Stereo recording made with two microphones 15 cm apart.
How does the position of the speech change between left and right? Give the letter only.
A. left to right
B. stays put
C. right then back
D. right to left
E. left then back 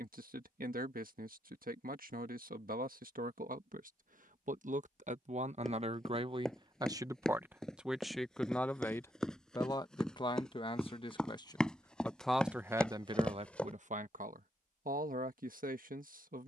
E.